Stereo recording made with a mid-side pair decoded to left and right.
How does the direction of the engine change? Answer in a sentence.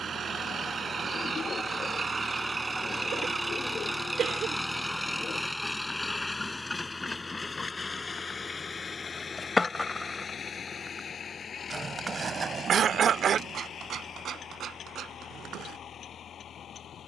You can hear the engine go from the right side to the left.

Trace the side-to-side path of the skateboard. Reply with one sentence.
In this clip you hear the skateboard move from left to right.